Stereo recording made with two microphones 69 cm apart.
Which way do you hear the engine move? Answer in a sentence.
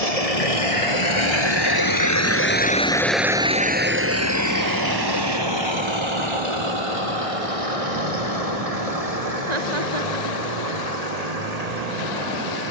In this clip you hear the engine move to the right.